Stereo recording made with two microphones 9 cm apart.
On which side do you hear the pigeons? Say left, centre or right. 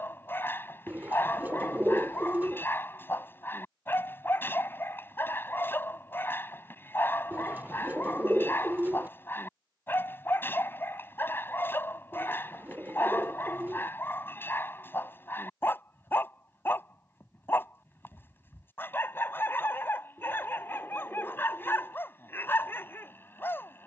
right.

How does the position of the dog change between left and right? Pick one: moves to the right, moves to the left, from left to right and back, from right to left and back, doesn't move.
doesn't move.